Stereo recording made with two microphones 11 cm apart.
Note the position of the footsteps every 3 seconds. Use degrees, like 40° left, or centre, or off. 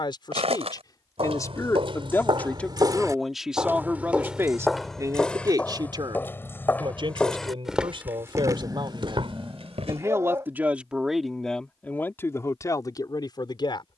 60° right, centre, centre, 60° right, off.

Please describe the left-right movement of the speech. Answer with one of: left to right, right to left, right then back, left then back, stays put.
right then back.